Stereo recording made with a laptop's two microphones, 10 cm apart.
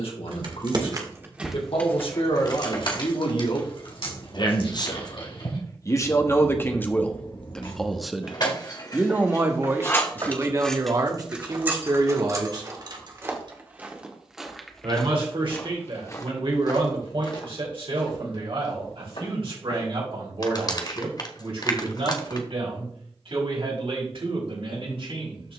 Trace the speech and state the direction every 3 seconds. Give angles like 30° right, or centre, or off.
70° left, 50° left, 10° left, 30° right, 50° right, 60° right, 60° right, 70° right, 70° right.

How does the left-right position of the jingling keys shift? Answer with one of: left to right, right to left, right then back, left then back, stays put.
left then back.